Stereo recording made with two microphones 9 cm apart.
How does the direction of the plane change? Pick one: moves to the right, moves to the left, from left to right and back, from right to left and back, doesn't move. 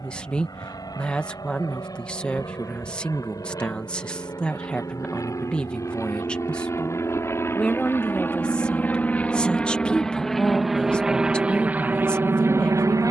moves to the right.